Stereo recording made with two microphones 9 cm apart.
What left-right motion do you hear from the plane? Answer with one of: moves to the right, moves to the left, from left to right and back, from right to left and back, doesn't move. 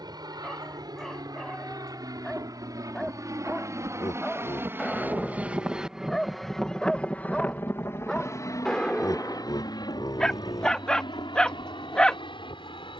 moves to the left.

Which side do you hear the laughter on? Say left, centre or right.
left.